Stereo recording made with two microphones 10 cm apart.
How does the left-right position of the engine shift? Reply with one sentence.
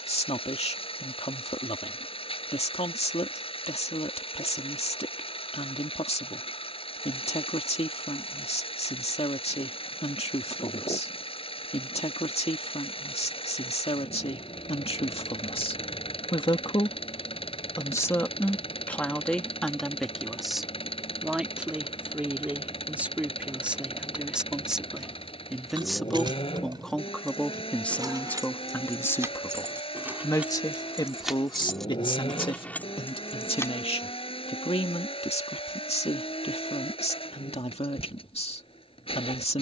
In this clip you hear the engine stay put.